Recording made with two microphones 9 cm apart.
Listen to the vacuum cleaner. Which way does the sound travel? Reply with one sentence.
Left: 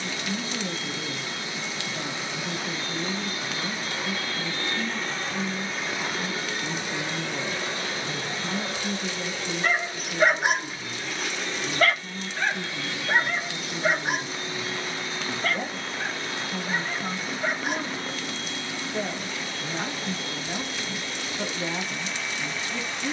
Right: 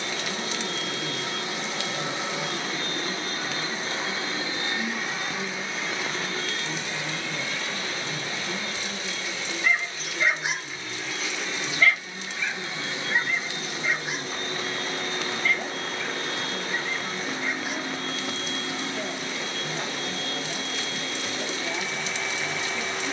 In this clip you hear the vacuum cleaner go left and come back.